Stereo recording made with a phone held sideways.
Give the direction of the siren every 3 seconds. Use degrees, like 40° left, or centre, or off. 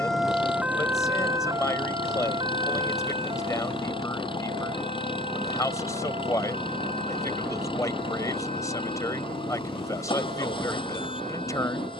20° right, 40° right, 50° right, 50° right.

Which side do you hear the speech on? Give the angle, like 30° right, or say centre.
20° left.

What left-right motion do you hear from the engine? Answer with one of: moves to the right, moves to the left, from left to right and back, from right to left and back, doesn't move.
doesn't move.